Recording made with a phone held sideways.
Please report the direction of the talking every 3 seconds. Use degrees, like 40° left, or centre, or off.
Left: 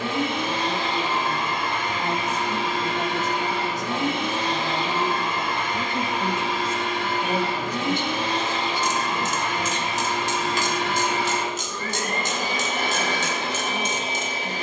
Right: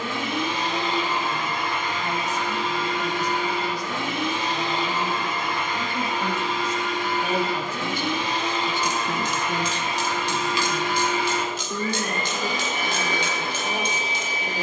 60° left, 40° left, centre, 40° right, 60° right.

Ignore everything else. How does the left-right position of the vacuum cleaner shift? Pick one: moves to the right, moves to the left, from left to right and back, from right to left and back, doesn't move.
doesn't move.